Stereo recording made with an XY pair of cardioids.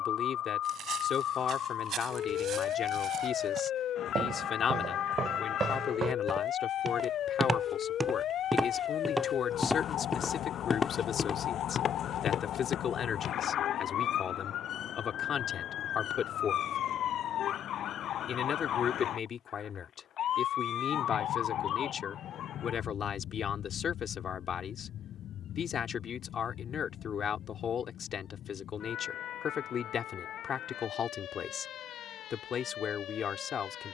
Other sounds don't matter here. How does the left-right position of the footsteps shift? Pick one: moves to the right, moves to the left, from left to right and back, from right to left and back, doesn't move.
moves to the left.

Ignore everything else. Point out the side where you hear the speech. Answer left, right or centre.
left.